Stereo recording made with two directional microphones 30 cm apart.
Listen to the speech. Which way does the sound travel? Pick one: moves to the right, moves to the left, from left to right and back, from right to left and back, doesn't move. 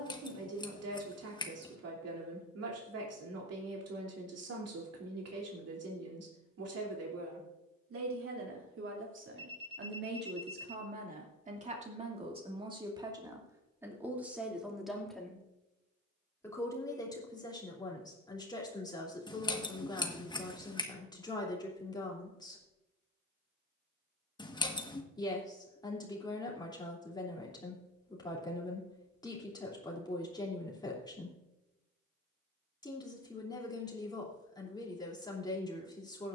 moves to the left.